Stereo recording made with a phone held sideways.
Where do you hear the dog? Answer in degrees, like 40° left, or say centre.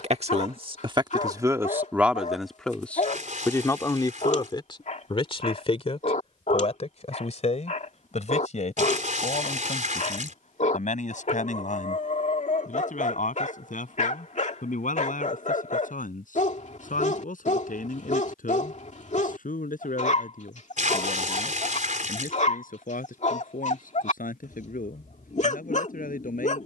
50° left.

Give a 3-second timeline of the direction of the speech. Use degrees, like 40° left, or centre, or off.
20° right, 30° left, 50° left, 50° left, 60° left, 60° left, 60° left, 60° left, 60° left.